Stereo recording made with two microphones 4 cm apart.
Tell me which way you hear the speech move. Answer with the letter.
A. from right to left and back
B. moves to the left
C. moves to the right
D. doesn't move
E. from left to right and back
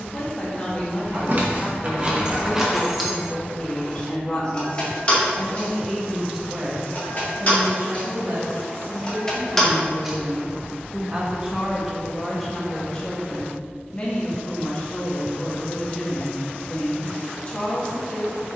E.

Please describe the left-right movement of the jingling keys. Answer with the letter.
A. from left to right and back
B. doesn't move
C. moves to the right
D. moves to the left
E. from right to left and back
E.